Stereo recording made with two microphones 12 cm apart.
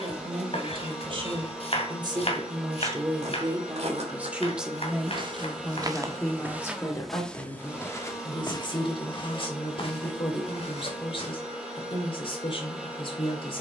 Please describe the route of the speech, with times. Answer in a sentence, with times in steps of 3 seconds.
You can hear the speech on the right from 0 s, in the centre from 3 s and on the left from 6 s.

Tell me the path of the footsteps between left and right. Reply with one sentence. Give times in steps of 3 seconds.
You can hear the footsteps not at all from 0 s, on the right from 3 s, in the centre from 6 s, on the left from 9 s and not at all from 12 s.